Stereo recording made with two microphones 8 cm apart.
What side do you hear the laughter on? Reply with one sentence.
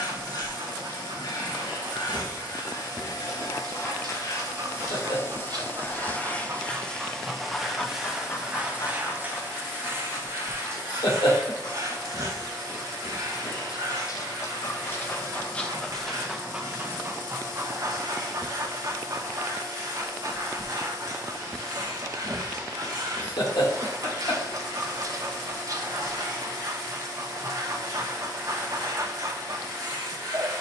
In this clip you hear the laughter on the left.